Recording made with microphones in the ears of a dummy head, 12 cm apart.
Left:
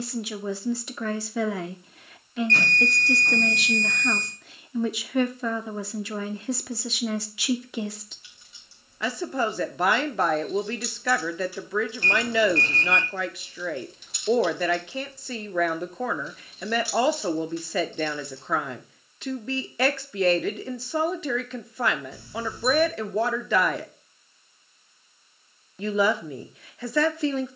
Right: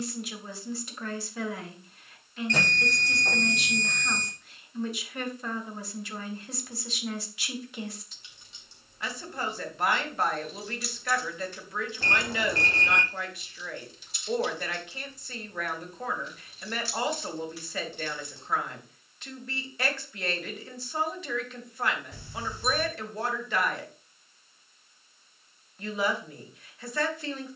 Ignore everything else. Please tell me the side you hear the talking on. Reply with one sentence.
In this clip you hear the talking on the left.